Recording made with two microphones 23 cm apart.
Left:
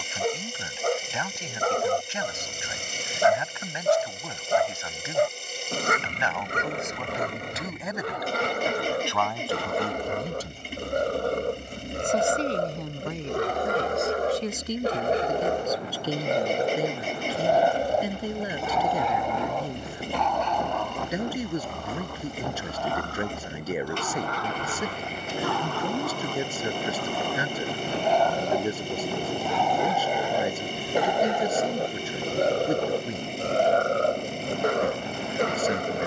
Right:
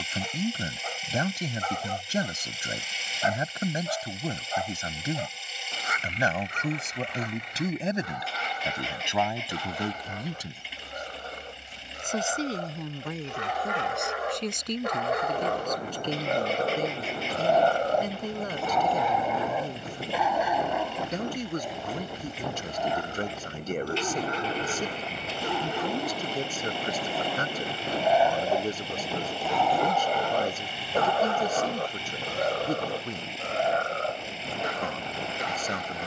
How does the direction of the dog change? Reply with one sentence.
You can hear the dog move from left to right and back again.